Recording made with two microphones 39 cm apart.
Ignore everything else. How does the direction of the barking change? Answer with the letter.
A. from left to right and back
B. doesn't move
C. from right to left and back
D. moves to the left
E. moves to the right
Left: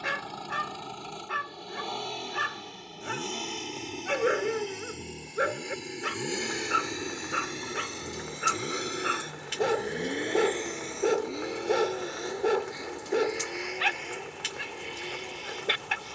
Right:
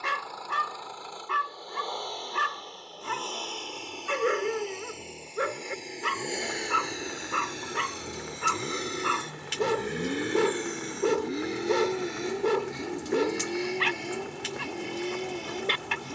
B.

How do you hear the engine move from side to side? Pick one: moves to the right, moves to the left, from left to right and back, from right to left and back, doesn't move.
moves to the right.